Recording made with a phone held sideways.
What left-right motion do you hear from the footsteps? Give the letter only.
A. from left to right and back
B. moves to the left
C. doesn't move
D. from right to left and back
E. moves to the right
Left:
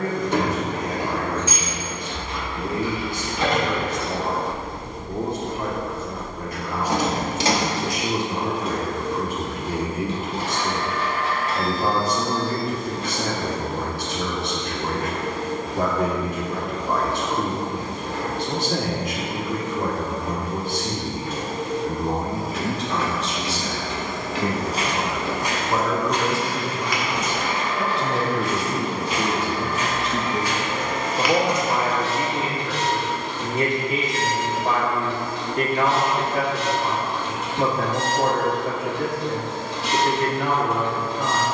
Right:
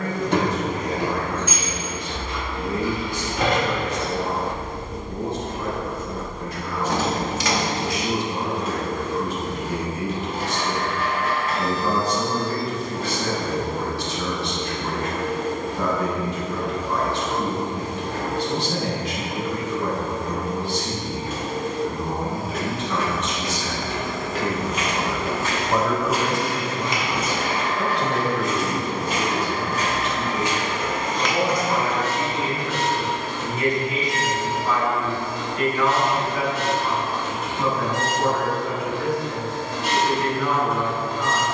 A.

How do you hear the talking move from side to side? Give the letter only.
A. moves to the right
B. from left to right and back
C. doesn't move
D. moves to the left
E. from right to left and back
B.